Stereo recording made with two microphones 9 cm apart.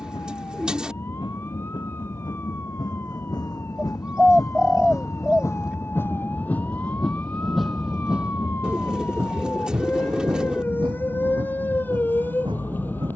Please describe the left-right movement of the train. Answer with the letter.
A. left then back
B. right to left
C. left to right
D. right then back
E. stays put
C.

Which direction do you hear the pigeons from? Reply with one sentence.
You can hear the pigeons in the centre.